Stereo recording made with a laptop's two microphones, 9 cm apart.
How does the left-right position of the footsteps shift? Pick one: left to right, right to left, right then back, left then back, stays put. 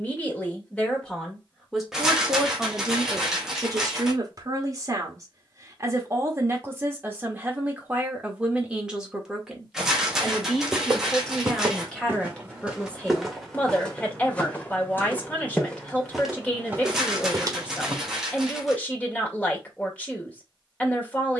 left then back.